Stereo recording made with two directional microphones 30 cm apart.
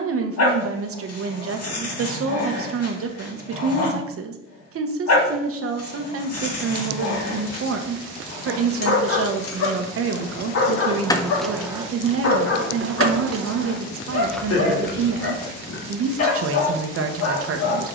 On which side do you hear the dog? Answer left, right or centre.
left.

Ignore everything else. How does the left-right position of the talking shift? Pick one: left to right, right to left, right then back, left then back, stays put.
stays put.